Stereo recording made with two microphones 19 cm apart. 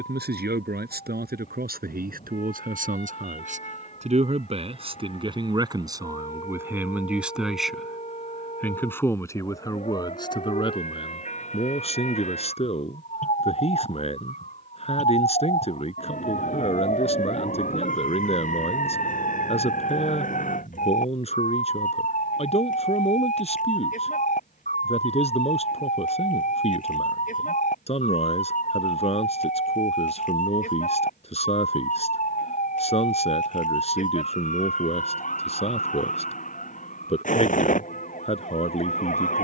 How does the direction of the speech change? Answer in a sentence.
In this clip you hear the speech move to the left.